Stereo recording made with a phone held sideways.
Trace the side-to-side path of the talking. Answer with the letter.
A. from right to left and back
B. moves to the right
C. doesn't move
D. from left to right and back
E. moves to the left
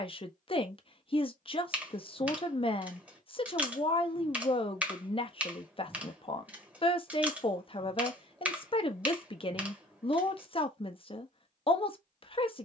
C.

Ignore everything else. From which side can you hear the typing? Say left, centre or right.
centre.